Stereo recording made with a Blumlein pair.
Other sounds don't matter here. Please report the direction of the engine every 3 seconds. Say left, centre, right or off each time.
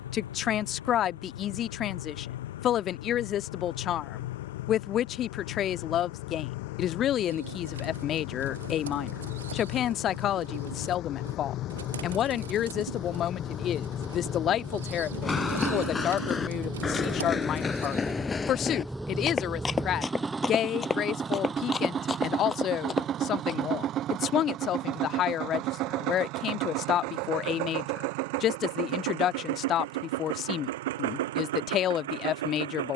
left, left, left, left, left, centre, centre, right, right, right, right.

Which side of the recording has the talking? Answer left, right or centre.
left.